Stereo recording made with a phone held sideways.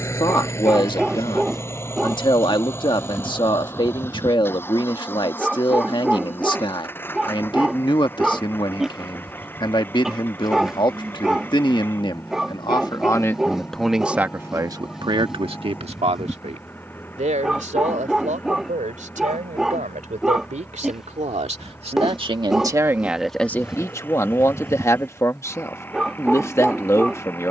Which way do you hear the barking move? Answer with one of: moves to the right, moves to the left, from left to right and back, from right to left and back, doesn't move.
doesn't move.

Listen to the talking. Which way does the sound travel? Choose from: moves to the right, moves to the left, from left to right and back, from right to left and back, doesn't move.
from left to right and back.